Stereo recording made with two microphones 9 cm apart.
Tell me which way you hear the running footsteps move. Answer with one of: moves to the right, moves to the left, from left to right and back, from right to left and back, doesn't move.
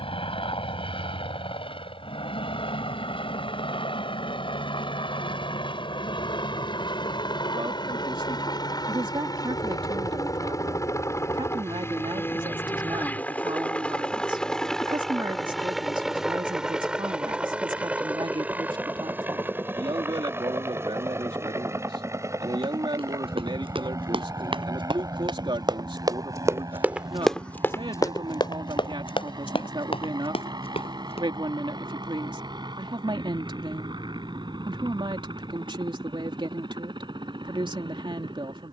moves to the left.